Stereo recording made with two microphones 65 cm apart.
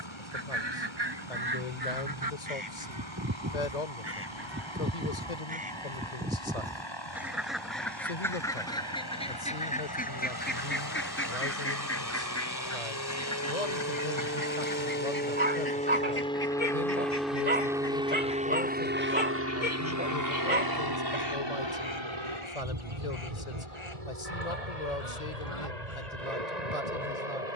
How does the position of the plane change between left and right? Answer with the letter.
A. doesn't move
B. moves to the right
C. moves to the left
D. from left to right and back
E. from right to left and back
B.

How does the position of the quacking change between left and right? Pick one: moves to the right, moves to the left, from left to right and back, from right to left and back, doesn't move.
moves to the left.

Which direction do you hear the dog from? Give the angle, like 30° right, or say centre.
10° right.